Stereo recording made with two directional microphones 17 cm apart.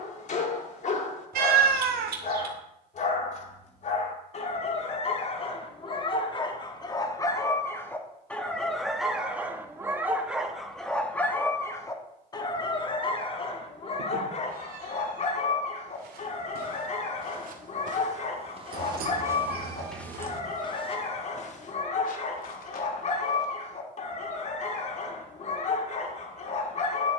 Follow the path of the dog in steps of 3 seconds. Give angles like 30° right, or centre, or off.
40° left, 40° left, 20° left, centre, 30° left, 40° left, 40° left, 40° left, 40° left.